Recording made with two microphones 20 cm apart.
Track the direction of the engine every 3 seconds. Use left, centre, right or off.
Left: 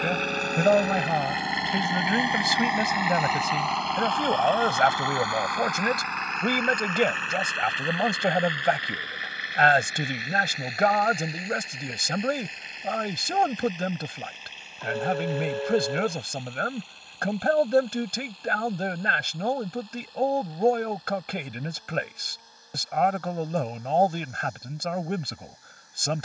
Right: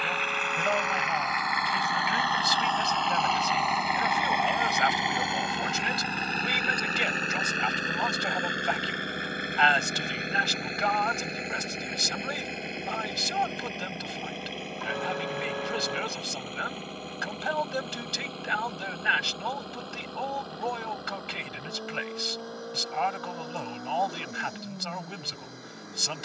left, centre, right, right, right, right, right, right, right.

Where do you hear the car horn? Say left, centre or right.
left.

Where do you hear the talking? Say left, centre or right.
left.